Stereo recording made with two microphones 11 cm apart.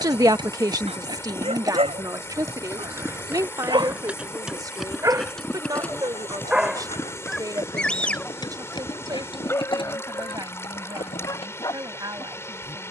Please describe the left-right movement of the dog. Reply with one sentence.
In this clip you hear the dog go from the right side to the left.